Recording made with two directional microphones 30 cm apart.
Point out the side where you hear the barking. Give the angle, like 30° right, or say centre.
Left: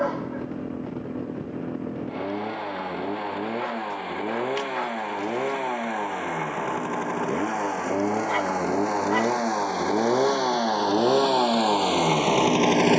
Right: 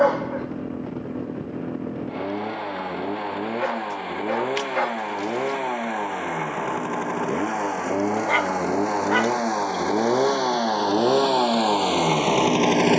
40° right.